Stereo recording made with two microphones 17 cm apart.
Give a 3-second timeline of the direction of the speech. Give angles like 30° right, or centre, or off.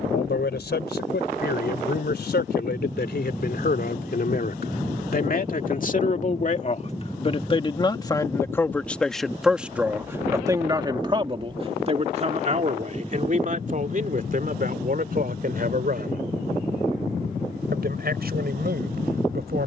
70° left, 60° left, 30° left, 20° right, 50° right, 60° right, 70° right.